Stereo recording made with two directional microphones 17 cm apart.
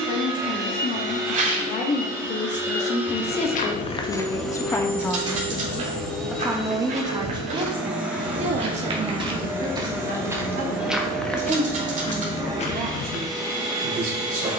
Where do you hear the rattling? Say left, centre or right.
right.